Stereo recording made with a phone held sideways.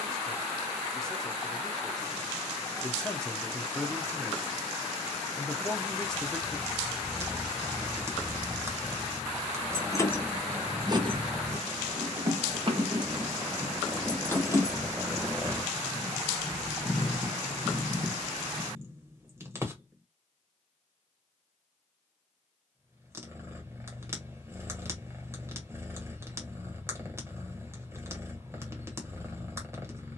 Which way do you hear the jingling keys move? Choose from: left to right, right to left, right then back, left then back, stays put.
right then back.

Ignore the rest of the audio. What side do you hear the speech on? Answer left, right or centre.
centre.